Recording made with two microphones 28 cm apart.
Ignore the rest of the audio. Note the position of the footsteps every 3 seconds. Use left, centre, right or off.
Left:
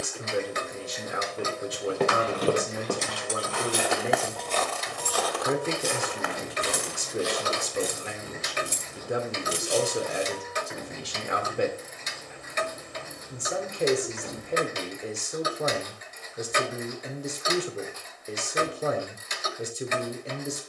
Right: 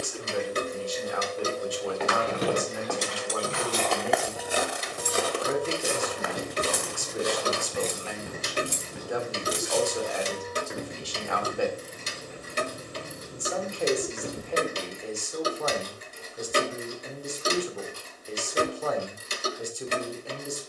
left, centre, right, right, off, off, off.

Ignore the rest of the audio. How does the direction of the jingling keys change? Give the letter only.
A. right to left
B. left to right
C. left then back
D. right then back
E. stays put
A.